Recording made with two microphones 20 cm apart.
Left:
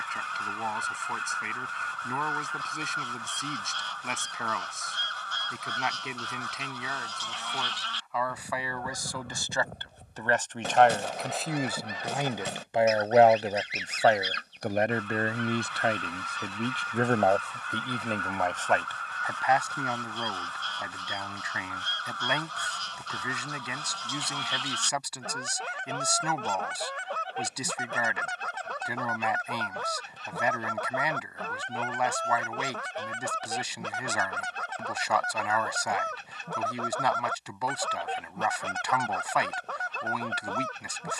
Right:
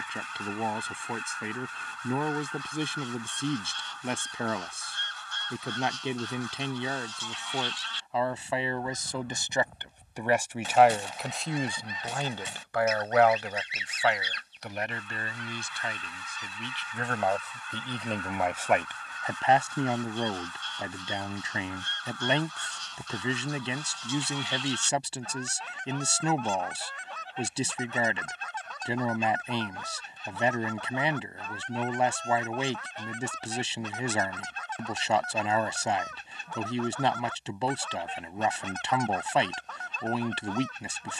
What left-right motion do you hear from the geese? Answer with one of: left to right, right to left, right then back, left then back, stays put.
stays put.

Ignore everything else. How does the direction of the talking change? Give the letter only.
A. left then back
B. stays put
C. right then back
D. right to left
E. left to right
A.